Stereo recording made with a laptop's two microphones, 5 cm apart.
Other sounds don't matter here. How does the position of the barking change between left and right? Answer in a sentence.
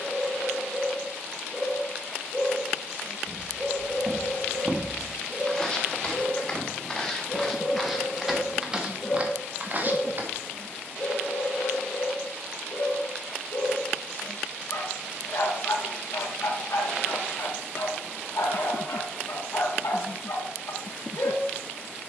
In this clip you hear the barking travel towards the left.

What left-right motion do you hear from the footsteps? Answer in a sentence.
You can hear the footsteps go left and come back.